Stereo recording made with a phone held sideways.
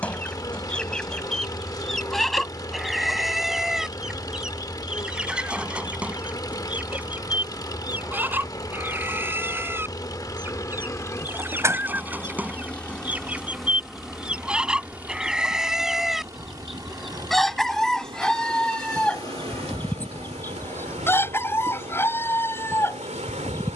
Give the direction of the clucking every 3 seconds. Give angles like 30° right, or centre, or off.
centre, centre, 10° right, 10° right, 10° right, centre, 10° left, 20° left.